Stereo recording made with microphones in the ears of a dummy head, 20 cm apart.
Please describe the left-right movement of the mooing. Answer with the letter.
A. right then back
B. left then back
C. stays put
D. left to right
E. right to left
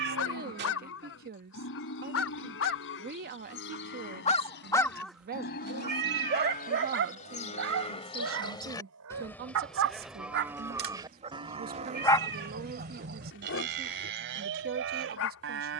D.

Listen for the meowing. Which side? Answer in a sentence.
You can hear the meowing on the right.